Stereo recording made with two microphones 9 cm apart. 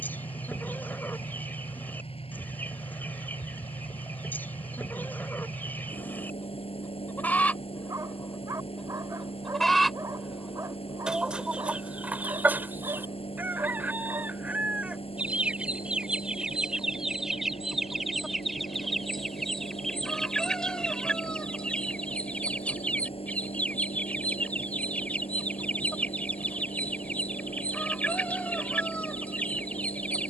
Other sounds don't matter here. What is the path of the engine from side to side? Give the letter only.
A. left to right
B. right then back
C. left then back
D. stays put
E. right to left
D.